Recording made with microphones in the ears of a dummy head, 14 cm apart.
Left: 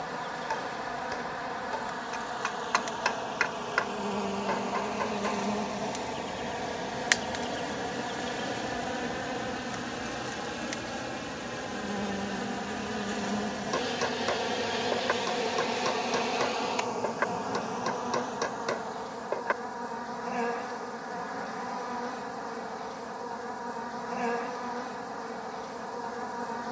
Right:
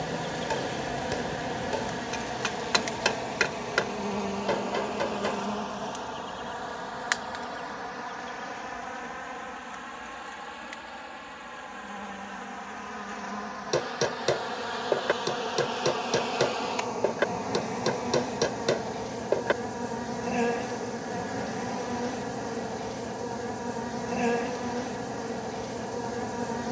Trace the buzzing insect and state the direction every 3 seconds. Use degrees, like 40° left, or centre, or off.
30° right, centre, 30° left, 50° left, 30° left, centre, 30° right, 30° right, 30° right.